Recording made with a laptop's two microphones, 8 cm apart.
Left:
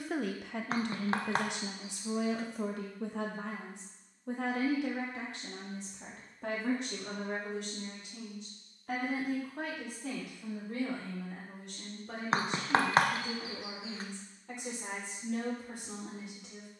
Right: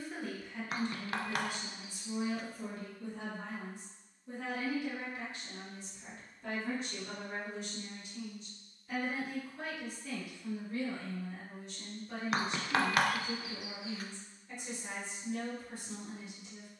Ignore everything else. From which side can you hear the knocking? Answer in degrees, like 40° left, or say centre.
30° left.